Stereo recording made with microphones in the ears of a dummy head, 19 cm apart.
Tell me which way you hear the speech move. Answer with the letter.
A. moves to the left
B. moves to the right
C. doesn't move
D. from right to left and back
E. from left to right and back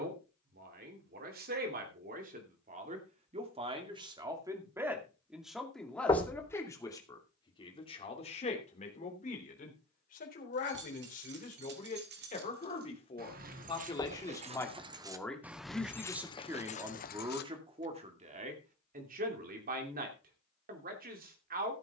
D.